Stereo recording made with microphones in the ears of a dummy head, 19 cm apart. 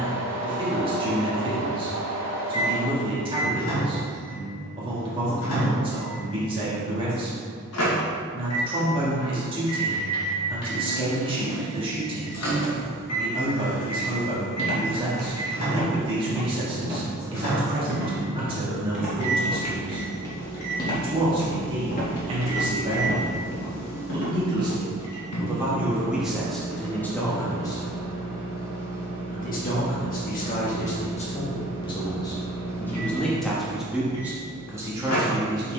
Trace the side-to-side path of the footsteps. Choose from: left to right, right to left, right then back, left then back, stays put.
right then back.